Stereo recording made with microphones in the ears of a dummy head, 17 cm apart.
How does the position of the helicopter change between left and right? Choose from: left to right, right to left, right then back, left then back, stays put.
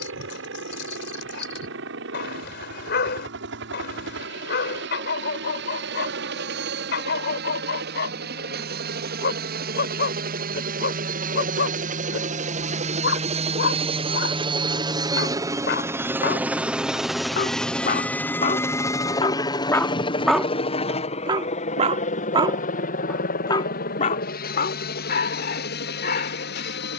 right to left.